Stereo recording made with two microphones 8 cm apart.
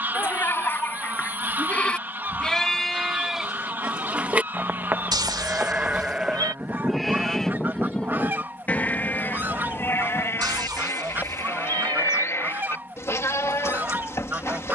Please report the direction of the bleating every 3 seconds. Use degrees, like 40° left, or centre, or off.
20° left, 10° right, centre, 30° left, 30° left.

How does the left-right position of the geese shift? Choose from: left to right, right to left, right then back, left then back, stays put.
stays put.